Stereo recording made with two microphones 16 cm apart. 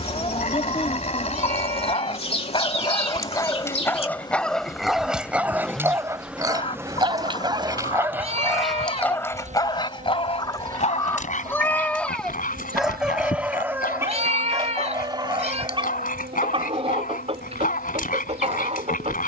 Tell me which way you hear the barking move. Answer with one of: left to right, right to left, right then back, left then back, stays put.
right then back.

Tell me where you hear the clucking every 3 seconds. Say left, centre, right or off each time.
left, left, left, left, centre, right, right.